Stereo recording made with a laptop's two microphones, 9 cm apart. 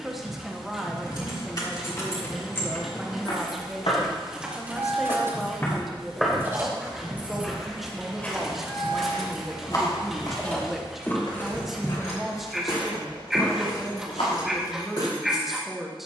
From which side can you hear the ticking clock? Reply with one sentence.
In this clip you hear the ticking clock in the centre.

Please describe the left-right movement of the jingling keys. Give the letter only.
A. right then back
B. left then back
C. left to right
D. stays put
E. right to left
A.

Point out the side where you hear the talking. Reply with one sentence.
In this clip you hear the talking in the centre.